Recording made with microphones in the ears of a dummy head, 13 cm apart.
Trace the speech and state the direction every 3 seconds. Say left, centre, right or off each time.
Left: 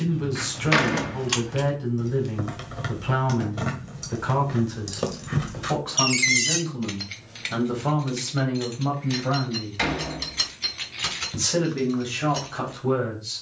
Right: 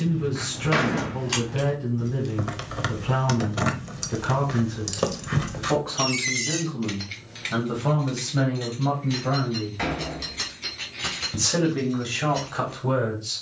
left, left, left, centre, centre.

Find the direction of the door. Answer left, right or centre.
left.